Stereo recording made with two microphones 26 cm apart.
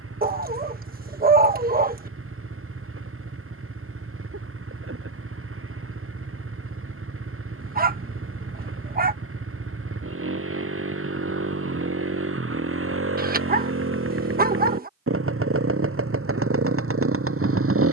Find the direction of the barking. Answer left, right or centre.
right.